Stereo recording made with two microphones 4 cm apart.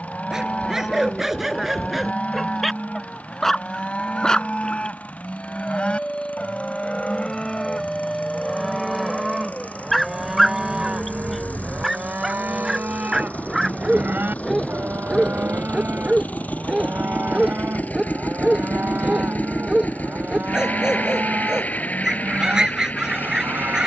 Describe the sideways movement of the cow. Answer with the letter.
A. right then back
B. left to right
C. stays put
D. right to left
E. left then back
B.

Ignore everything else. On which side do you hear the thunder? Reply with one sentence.
In this clip you hear the thunder in the centre.